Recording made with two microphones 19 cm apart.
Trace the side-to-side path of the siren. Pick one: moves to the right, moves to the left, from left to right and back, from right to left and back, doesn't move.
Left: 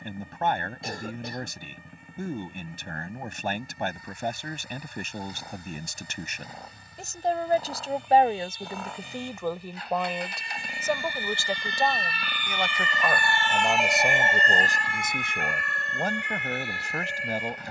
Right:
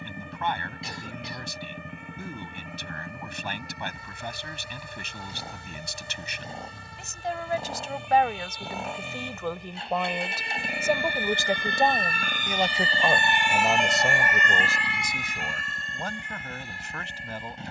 moves to the left.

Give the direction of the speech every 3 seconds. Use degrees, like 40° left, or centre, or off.
50° left, 50° left, 40° left, centre, 10° right, 40° left.